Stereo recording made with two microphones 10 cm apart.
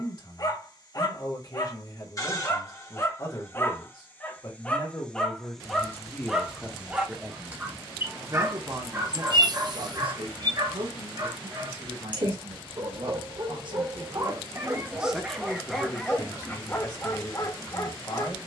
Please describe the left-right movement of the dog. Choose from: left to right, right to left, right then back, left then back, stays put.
right then back.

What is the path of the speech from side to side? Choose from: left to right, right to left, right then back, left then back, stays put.
right then back.